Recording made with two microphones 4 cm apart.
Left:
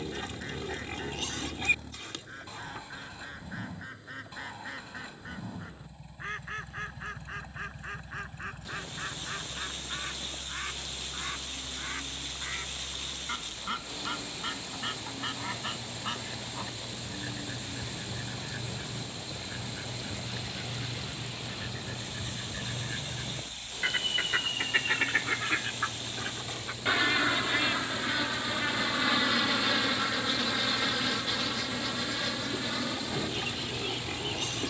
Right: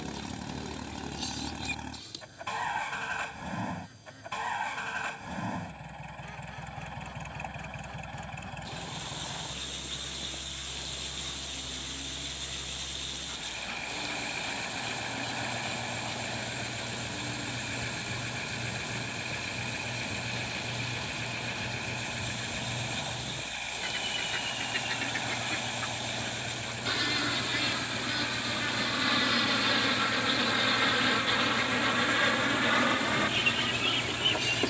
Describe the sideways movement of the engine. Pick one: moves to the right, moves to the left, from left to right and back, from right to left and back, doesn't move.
doesn't move.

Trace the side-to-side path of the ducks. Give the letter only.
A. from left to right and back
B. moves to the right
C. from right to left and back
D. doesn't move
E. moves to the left
B.